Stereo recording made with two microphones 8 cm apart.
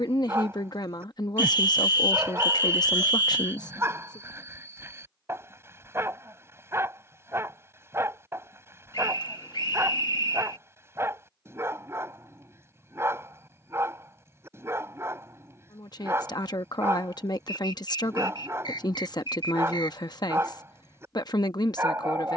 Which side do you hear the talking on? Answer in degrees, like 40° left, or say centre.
60° left.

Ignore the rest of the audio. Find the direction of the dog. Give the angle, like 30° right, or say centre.
30° right.